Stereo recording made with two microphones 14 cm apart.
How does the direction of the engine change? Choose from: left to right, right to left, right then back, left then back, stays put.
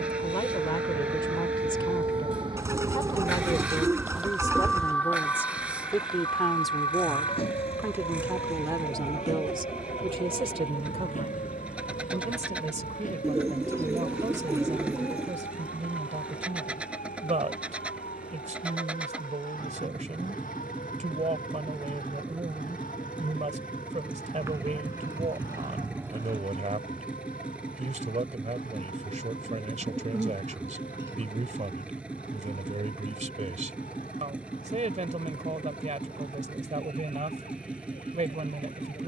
stays put.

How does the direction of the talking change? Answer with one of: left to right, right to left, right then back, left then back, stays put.
left to right.